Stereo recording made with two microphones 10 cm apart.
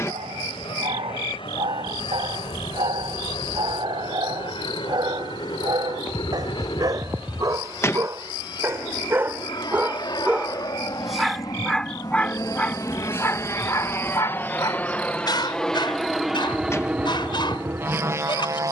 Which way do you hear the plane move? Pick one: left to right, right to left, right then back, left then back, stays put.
left to right.